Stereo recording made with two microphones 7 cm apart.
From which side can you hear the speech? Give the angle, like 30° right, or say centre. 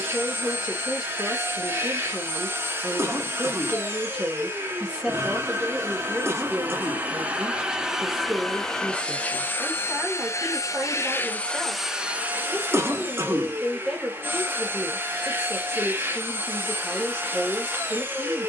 10° right.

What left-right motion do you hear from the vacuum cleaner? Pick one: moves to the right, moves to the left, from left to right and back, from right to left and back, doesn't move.
from right to left and back.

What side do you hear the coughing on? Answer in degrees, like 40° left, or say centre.
40° right.